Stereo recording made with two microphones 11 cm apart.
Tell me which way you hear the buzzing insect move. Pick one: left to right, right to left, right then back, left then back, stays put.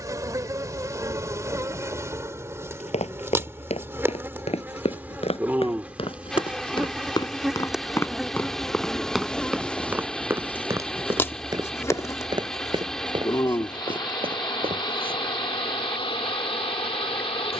right to left.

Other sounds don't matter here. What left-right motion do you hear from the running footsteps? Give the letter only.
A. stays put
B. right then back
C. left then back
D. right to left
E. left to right
E.